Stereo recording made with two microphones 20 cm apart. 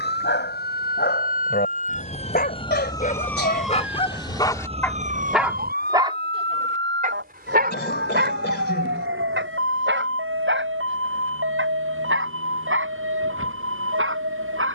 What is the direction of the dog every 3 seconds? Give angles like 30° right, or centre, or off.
50° left, 20° left, 50° right, 70° right, 80° right.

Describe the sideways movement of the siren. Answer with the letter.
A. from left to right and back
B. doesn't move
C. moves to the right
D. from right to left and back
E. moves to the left
C.